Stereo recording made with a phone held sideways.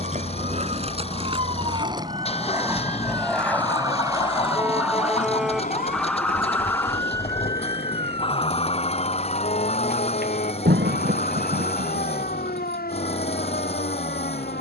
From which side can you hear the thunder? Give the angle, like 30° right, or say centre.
90° right.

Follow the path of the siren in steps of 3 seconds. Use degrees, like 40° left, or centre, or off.
40° right, 10° right, 20° left, 60° left, 70° left.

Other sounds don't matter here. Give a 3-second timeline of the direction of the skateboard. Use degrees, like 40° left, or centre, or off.
30° right, 30° left, 70° left, off, off.